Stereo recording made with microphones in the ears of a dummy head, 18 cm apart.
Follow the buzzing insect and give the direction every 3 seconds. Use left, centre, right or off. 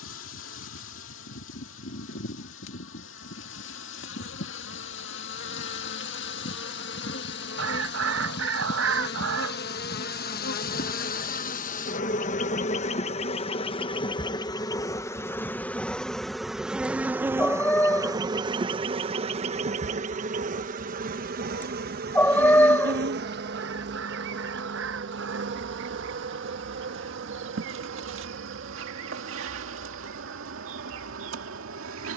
left, left, left, left, left, centre, right, right, right, right, right.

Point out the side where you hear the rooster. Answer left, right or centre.
right.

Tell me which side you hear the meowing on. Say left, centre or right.
centre.